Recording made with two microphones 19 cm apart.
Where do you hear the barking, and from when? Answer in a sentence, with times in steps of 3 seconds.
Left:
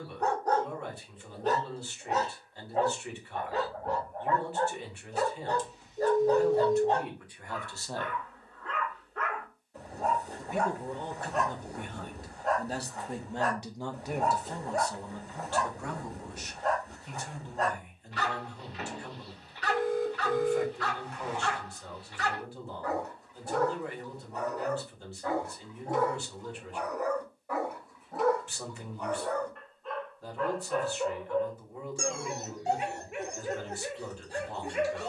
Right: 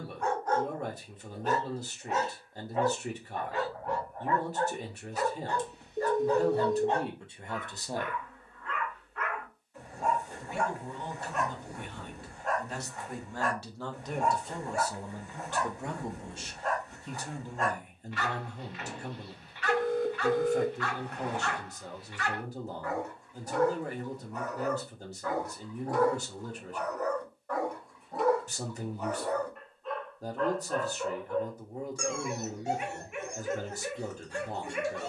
In this clip you hear the barking on the left from 0 s, in the centre from 27 s and on the left from 30 s.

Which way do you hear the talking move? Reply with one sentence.
You can hear the talking go left and come back.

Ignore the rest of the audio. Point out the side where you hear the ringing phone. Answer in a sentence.
In this clip you hear the ringing phone on the right.